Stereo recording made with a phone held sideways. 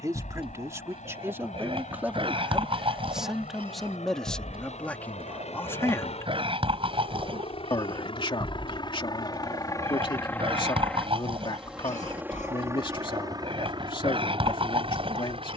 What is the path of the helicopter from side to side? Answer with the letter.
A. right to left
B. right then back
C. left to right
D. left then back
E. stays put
C.